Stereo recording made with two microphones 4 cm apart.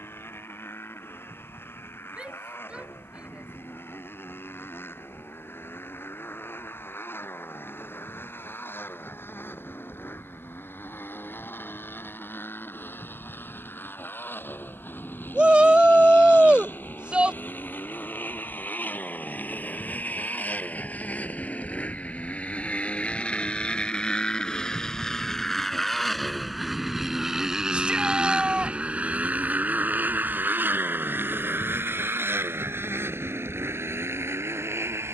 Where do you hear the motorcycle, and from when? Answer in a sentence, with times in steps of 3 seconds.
In this clip you hear the motorcycle on the left from 0 s, in the centre from 24 s and on the right from 27 s.